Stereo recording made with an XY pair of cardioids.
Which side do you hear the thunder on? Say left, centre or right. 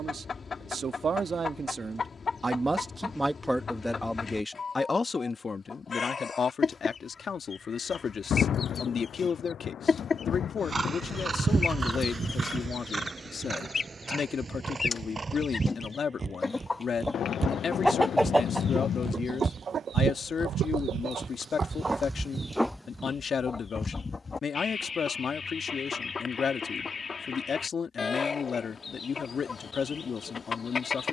left.